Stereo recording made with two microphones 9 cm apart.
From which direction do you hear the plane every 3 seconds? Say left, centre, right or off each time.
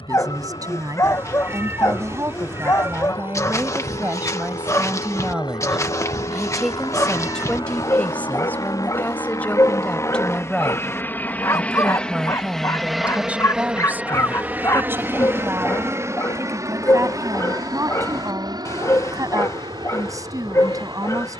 left, left, left, left, centre, right, right.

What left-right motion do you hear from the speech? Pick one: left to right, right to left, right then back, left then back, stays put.
left then back.